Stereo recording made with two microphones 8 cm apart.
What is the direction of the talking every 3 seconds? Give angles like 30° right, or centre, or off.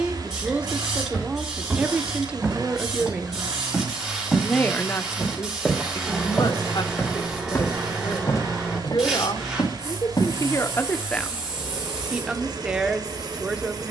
20° right, 20° left, 70° left, 40° left, 10° right.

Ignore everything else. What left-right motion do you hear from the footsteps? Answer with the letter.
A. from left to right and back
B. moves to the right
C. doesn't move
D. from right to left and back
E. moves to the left
E.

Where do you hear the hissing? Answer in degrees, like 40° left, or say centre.
10° right.